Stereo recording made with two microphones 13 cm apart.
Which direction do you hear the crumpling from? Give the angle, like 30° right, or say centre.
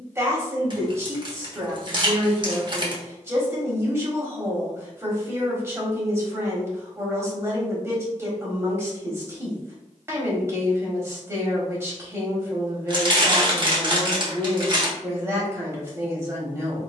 40° right.